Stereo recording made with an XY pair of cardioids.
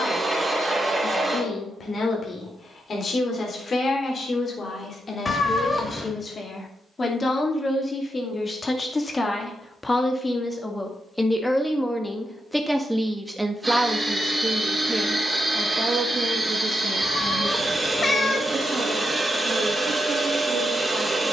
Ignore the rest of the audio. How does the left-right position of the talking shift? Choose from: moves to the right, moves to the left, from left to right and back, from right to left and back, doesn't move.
moves to the right.